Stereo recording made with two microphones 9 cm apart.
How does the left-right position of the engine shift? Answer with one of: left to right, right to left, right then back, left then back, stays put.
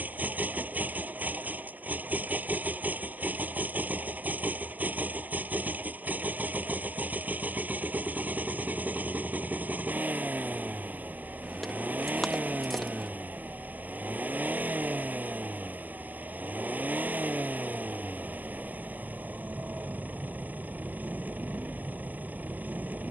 stays put.